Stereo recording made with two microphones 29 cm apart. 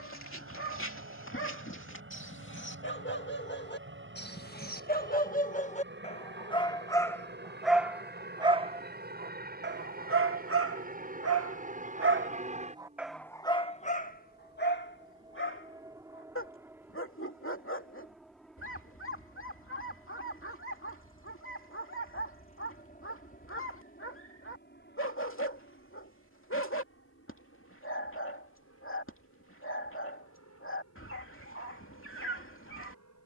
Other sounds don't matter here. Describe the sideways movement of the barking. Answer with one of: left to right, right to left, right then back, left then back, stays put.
right then back.